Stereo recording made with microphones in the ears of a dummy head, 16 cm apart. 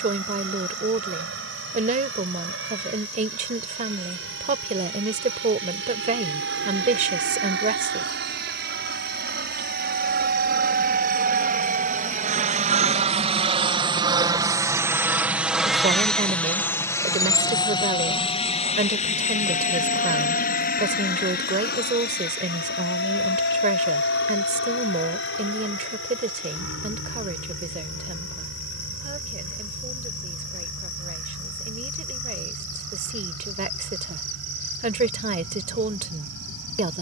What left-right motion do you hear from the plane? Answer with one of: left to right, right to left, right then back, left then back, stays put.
right to left.